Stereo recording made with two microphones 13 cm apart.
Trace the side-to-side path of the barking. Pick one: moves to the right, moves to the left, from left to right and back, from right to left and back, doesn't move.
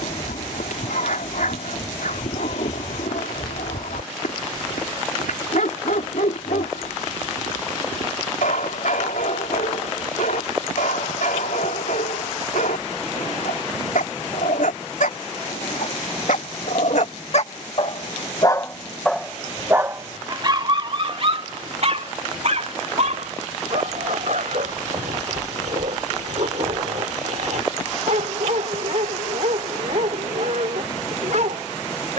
moves to the right.